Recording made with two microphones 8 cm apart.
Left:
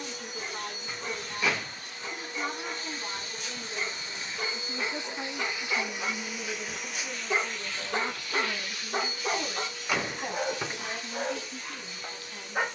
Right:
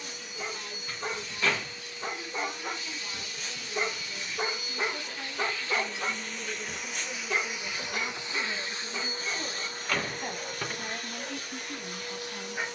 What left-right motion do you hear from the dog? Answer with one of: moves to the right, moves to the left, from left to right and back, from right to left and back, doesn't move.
moves to the left.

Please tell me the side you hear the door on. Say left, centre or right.
centre.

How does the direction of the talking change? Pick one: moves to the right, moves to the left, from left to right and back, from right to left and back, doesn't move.
moves to the right.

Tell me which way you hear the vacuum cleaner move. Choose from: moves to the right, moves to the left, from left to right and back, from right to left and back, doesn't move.
moves to the right.